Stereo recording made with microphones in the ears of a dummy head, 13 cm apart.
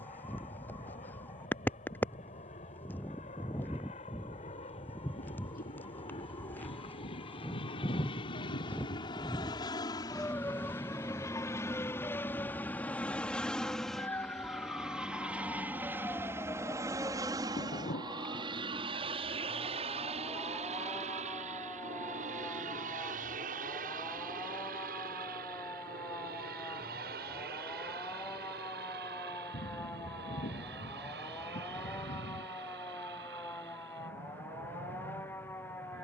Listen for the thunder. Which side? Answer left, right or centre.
left.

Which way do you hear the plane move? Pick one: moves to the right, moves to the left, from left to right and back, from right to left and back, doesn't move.
moves to the right.